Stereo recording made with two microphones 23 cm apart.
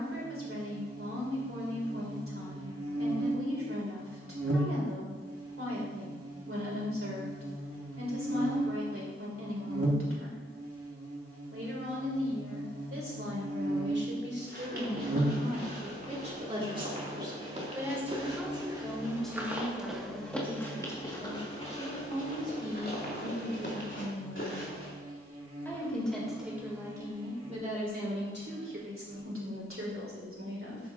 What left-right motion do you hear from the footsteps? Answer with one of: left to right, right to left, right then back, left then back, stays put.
right to left.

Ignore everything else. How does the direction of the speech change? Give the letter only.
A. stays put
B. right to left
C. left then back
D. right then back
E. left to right
C.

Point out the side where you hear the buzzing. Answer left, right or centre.
right.